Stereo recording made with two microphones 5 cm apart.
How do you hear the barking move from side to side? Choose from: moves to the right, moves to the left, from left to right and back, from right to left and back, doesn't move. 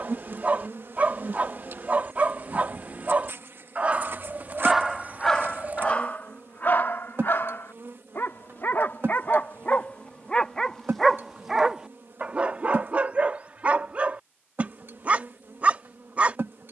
from right to left and back.